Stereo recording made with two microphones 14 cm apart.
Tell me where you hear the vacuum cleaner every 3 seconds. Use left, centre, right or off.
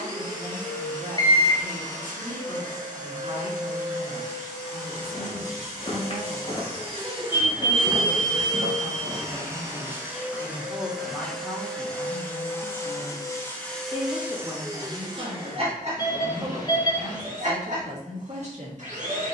right, right, right, centre, centre, right, right.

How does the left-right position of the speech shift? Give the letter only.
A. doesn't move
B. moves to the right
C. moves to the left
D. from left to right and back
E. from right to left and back
E.